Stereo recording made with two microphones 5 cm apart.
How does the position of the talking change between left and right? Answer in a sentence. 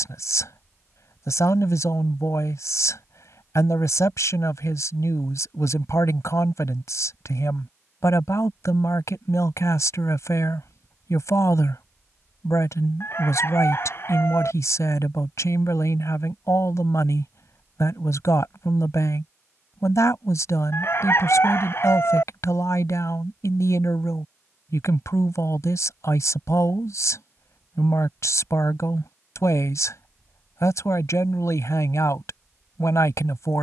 In this clip you hear the talking stay put.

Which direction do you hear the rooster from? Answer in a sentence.
You can hear the rooster on the left.